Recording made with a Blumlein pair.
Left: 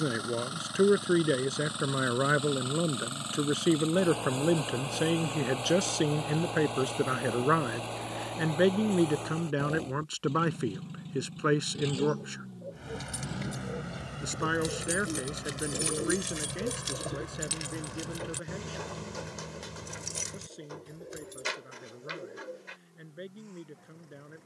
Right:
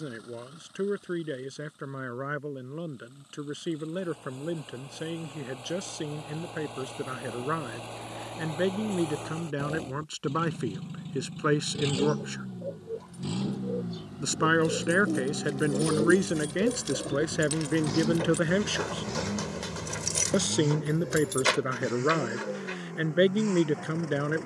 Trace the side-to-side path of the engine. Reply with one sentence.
You can hear the engine move from left to right.